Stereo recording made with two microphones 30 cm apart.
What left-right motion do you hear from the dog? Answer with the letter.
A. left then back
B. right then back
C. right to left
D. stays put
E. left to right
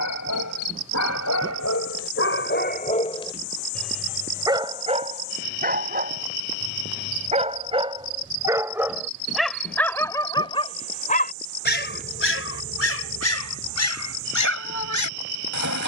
B.